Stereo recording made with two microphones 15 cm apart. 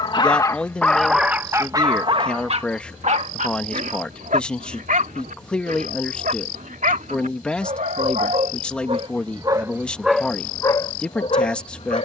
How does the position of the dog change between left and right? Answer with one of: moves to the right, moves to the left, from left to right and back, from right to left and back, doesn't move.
from left to right and back.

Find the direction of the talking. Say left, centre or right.
centre.